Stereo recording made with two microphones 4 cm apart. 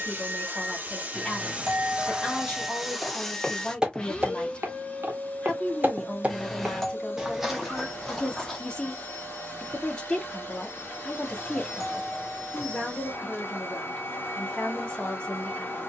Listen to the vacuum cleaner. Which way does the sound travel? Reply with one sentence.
In this clip you hear the vacuum cleaner travel towards the left.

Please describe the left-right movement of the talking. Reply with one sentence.
In this clip you hear the talking stay in one place.